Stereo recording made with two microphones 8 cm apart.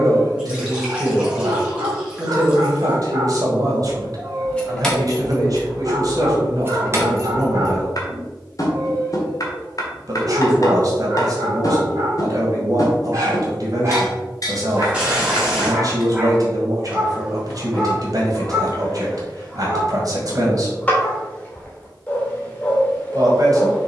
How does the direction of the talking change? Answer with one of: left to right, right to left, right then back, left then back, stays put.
stays put.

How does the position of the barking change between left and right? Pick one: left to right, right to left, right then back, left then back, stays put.
right to left.